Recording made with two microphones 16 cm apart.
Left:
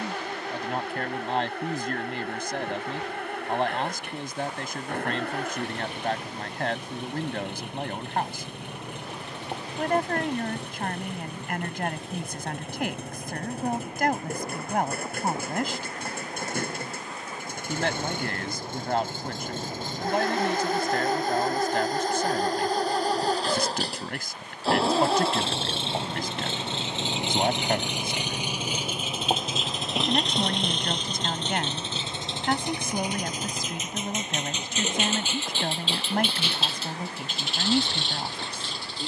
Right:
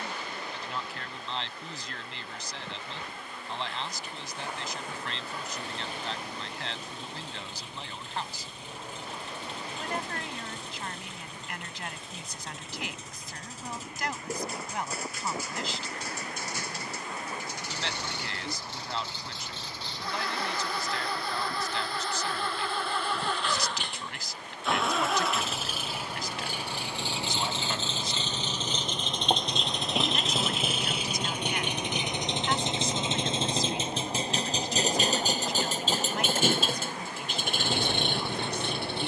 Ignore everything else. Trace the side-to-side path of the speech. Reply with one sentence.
In this clip you hear the speech stay put.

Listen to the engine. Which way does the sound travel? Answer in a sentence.
In this clip you hear the engine travel towards the right.